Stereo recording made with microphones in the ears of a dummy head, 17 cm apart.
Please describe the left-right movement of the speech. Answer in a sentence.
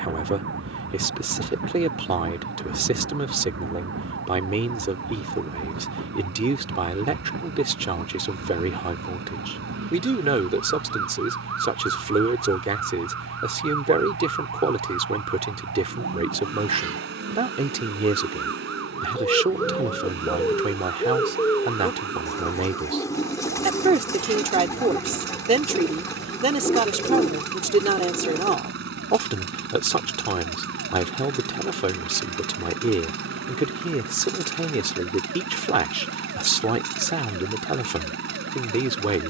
In this clip you hear the speech stay in one place.